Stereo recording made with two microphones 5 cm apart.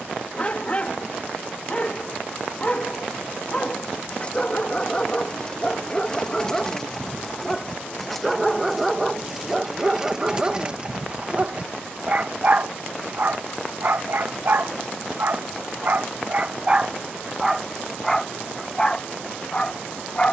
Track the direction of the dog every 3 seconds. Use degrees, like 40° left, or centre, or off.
30° left, 20° left, 10° left, 20° right, 50° right, 30° right, 20° left.